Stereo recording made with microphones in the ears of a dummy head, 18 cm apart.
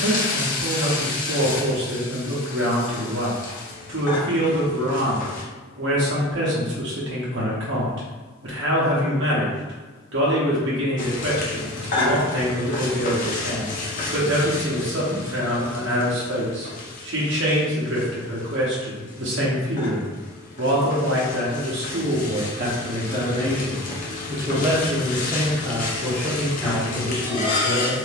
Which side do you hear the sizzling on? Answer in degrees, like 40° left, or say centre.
40° left.